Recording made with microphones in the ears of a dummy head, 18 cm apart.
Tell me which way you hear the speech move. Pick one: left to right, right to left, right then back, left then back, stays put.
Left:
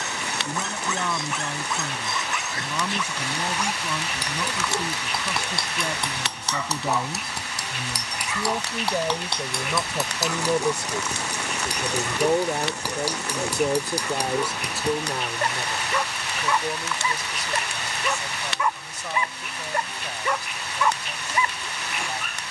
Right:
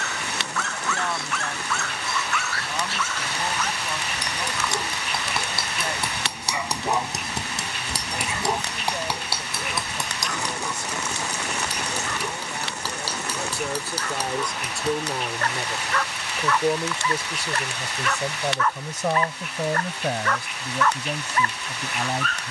left to right.